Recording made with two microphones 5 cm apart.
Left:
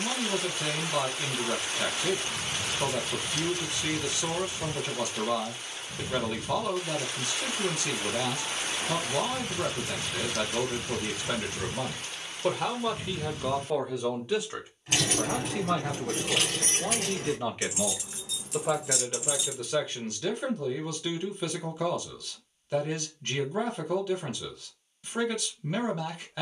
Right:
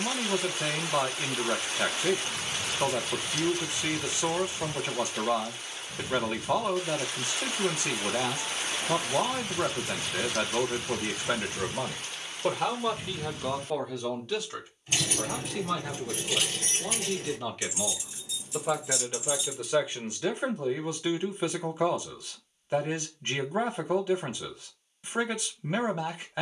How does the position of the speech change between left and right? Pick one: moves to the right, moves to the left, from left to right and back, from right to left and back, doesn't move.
from right to left and back.